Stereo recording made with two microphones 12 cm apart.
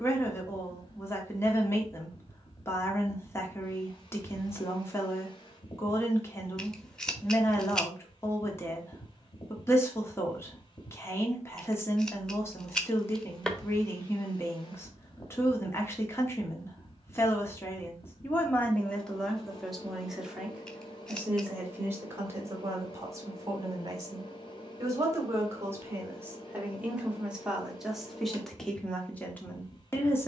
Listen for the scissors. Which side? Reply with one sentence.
You can hear the scissors in the centre.